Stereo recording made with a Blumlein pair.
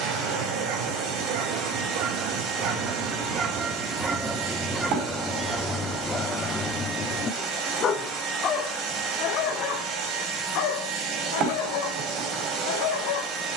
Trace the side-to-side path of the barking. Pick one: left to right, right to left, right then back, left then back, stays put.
right to left.